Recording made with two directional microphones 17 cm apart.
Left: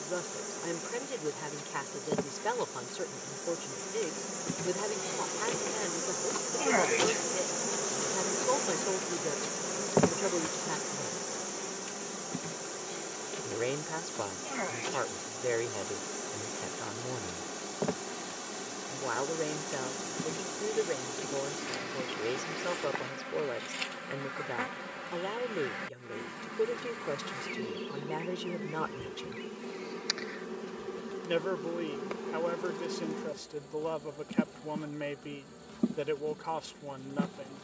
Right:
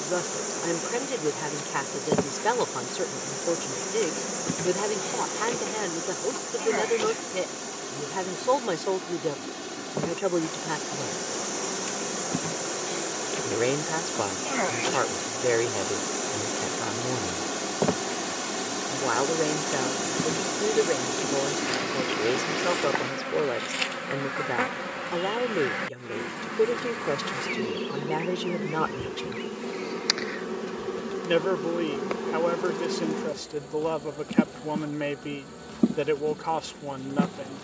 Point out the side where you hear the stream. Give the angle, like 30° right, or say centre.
60° right.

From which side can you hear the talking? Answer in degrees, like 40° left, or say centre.
40° right.